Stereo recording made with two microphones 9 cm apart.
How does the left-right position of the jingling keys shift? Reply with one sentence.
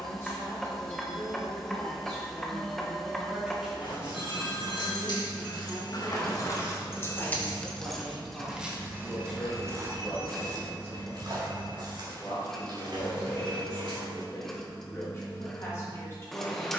You can hear the jingling keys move from left to right.